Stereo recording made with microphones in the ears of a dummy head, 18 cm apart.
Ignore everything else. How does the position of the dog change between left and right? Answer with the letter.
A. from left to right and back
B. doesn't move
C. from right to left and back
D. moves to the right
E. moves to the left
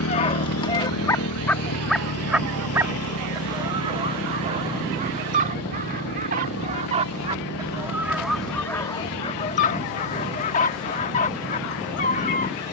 A.